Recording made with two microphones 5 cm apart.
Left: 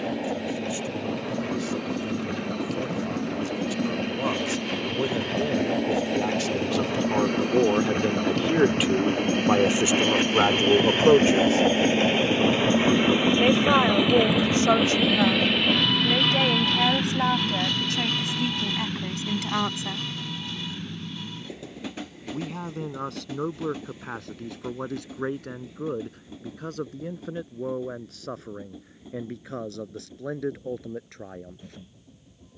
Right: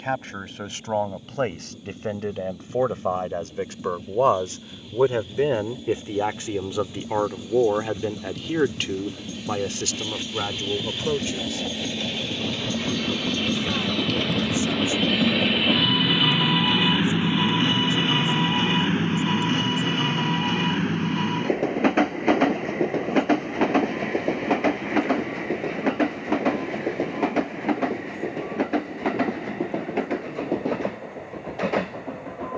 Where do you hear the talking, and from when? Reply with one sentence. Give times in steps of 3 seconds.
You can hear the talking on the right from 0 s, in the centre from 6 s and on the left from 9 s.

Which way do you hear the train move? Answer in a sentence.
In this clip you hear the train move from left to right.